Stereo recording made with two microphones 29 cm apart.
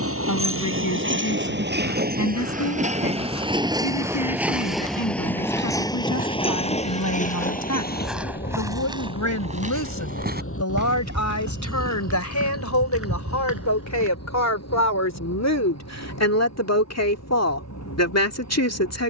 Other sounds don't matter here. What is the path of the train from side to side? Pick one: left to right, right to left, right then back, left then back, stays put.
right to left.